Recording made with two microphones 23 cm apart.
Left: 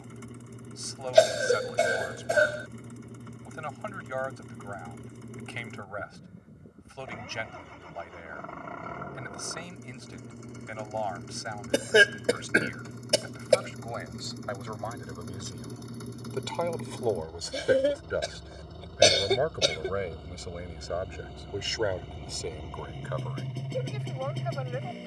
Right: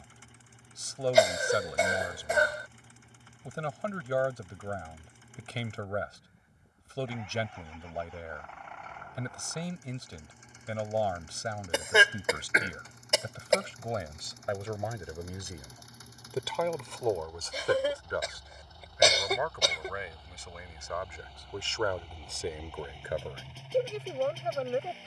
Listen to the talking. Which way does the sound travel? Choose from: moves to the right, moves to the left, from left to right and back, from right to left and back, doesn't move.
from right to left and back.